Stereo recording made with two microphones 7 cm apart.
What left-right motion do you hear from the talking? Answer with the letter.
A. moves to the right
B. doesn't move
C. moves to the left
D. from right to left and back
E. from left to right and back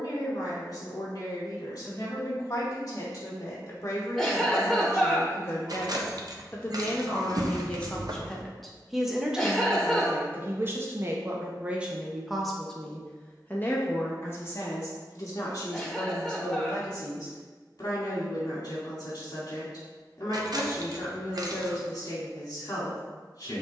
E.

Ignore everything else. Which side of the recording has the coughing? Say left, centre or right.
centre.